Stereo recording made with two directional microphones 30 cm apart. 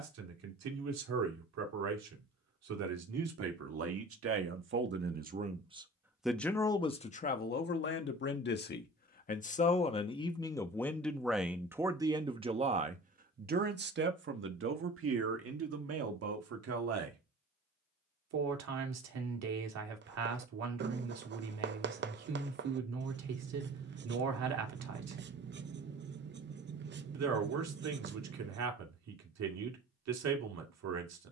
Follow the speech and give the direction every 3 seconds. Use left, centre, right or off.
right, right, left, centre, right, right, right, right, right, right, right.